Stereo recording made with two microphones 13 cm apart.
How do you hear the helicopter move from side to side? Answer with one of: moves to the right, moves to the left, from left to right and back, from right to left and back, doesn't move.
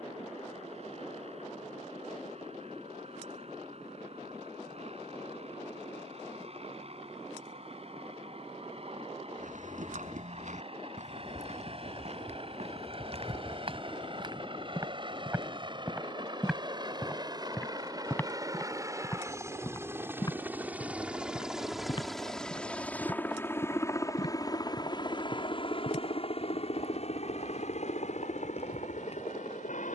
moves to the left.